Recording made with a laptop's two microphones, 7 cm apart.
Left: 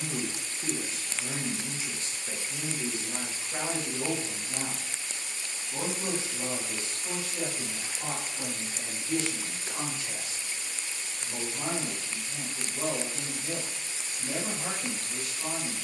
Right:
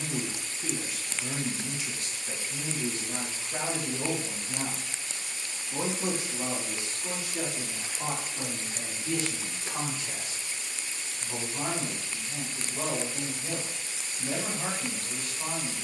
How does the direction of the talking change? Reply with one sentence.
In this clip you hear the talking go from the left side to the right.